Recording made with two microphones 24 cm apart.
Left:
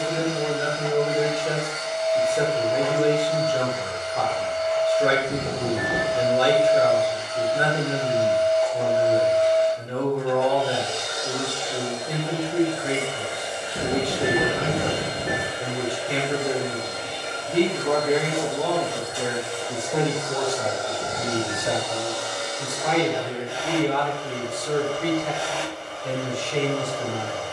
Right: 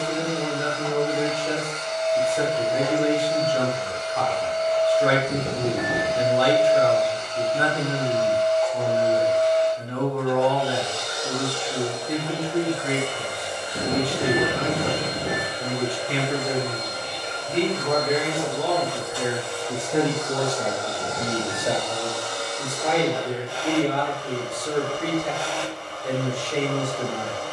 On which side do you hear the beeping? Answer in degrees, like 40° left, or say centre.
30° right.